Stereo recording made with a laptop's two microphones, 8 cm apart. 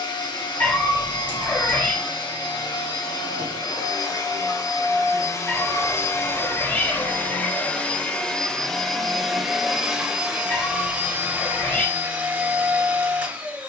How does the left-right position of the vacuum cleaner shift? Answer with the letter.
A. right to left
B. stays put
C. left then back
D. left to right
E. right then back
D.